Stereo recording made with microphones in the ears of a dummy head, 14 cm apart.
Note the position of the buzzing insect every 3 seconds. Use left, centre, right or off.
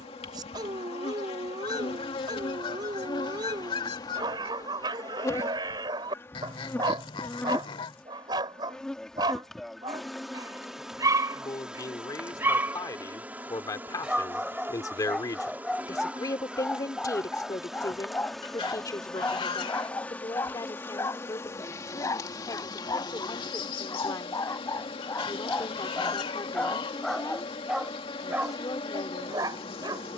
left, left, centre, centre, centre, centre, centre, left, left, left.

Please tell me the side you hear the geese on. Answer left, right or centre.
left.